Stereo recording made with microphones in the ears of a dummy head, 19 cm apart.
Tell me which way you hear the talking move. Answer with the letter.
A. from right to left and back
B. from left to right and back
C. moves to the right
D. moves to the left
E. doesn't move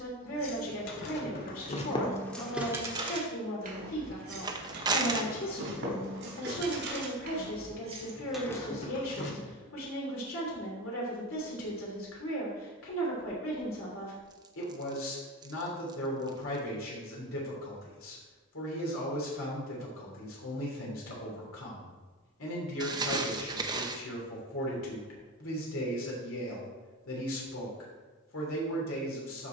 E.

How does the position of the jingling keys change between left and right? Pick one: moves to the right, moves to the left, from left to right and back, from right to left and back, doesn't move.
from left to right and back.